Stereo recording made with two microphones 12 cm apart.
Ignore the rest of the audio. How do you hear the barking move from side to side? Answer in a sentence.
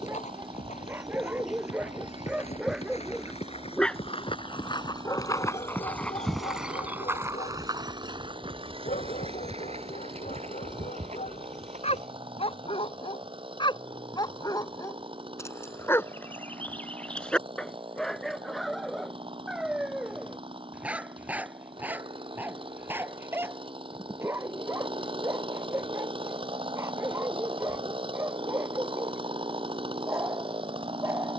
You can hear the barking move from right to left and back again.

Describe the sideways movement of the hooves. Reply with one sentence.
In this clip you hear the hooves move to the right.